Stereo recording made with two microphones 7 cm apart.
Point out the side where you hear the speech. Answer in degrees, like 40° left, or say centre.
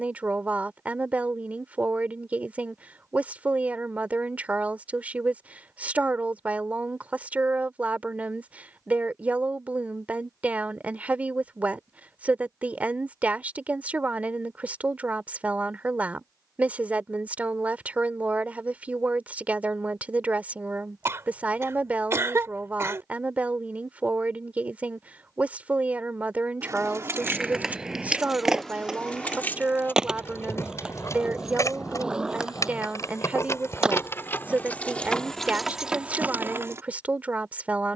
20° right.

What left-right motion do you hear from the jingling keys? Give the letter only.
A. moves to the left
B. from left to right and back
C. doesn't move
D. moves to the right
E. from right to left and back
E.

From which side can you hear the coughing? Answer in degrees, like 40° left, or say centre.
40° right.